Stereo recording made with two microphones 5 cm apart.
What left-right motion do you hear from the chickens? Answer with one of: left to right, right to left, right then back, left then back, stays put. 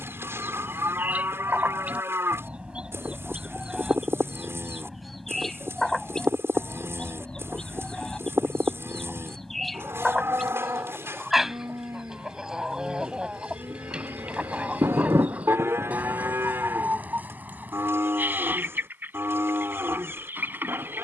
left then back.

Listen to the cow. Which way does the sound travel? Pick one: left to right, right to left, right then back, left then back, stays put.
stays put.